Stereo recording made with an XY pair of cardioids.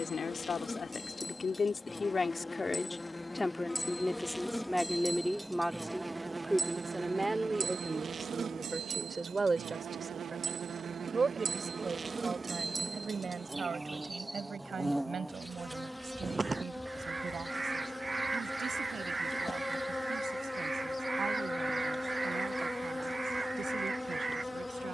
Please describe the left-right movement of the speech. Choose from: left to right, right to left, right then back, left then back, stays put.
left to right.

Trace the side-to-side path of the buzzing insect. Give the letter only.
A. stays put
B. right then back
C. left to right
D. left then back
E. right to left
B.